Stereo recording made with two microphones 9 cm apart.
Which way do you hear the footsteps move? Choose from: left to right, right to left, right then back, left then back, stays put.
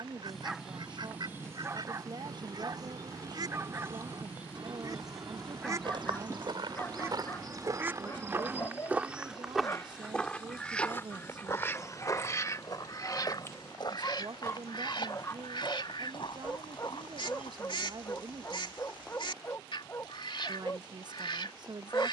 right to left.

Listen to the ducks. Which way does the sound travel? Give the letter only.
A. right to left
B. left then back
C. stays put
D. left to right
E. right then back
A.